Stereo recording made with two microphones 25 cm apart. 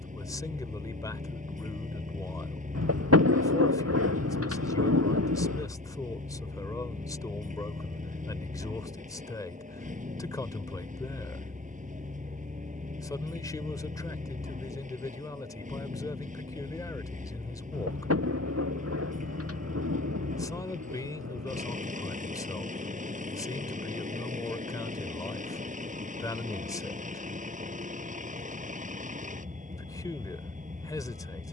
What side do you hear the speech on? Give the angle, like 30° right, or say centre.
10° left.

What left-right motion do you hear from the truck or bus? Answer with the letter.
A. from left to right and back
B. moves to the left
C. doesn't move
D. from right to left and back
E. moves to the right
C.